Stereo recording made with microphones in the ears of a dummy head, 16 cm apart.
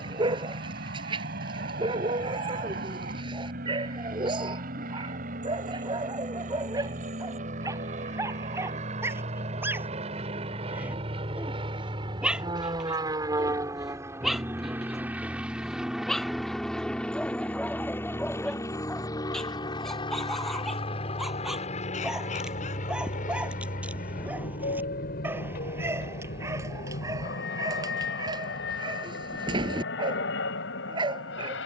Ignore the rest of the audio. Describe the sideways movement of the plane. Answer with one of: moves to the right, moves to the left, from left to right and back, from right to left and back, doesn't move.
moves to the left.